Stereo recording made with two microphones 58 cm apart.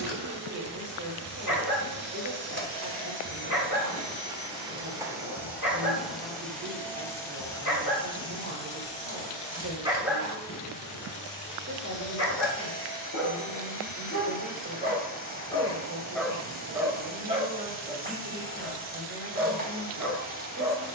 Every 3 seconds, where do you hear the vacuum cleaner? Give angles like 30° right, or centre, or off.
20° right, 10° right, 10° left, 20° left, 20° left, 20° left, 20° left.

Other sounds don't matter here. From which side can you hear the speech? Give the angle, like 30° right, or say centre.
30° right.